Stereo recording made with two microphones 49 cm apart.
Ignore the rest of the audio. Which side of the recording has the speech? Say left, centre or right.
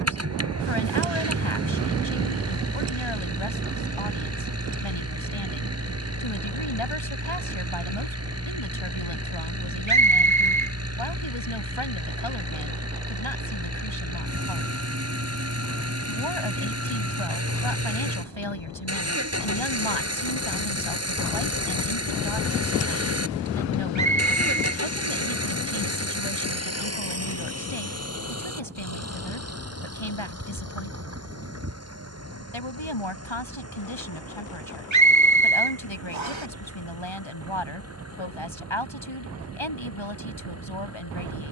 left.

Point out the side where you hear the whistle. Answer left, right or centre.
right.